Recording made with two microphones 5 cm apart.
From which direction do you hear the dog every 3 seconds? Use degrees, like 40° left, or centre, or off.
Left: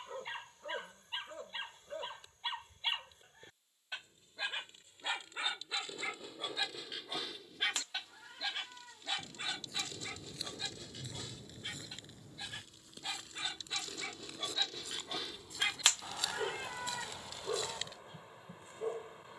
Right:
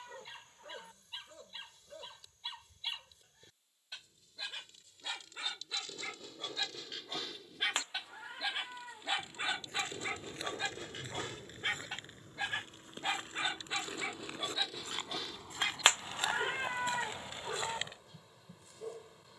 40° left, 30° left, centre, 40° right, 30° right, 20° left, 30° left.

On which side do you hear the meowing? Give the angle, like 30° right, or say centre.
30° right.